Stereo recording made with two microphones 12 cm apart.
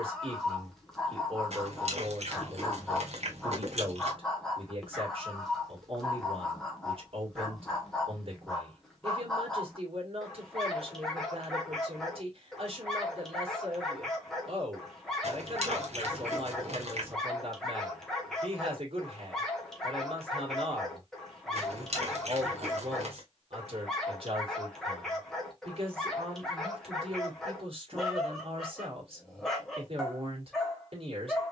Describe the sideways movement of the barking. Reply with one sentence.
In this clip you hear the barking stay in one place.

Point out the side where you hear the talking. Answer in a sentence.
In this clip you hear the talking on the right.